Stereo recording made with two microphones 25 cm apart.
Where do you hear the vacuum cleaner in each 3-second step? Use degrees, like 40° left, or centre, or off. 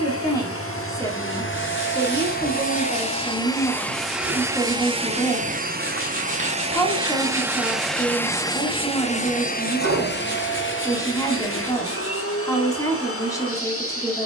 50° left, 10° right, 10° right, 50° left, 60° left.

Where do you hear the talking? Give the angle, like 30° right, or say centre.
10° left.